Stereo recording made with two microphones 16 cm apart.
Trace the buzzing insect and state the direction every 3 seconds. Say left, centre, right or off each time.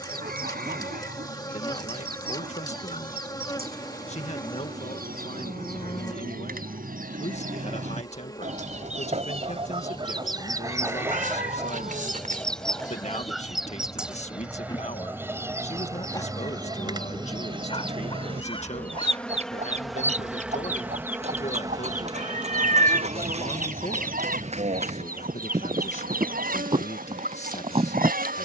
left, left, left, left, left, left, centre, right, right, right.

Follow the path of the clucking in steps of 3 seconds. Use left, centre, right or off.
right, right, right, right, centre, right, right, right, right, right.